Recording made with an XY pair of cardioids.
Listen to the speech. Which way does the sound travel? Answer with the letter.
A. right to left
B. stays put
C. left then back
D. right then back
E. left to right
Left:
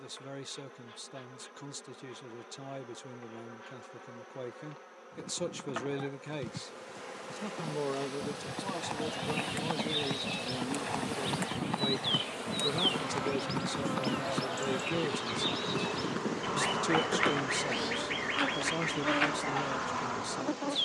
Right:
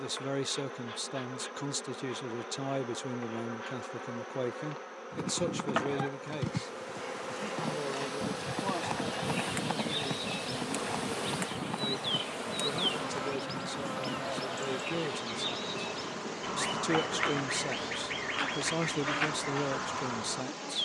C.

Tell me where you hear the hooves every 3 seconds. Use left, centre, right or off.
off, right, right, centre, left, left, off.